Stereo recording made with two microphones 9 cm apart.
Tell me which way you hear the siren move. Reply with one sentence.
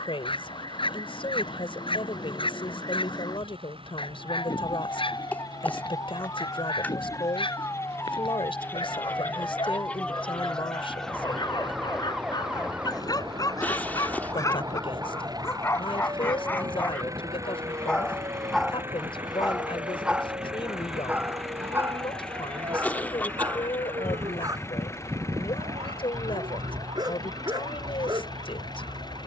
In this clip you hear the siren move from left to right.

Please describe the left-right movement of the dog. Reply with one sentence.
In this clip you hear the dog move from left to right.